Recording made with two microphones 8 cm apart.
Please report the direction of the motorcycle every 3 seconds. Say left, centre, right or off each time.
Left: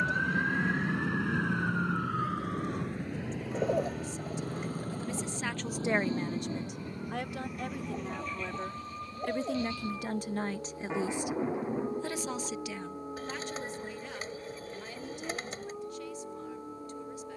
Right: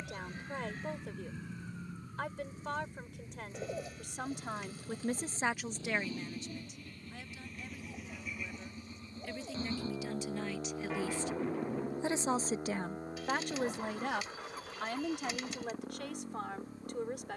left, left, centre, right, right, right.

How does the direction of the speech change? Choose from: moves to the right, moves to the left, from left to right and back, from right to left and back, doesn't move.
from right to left and back.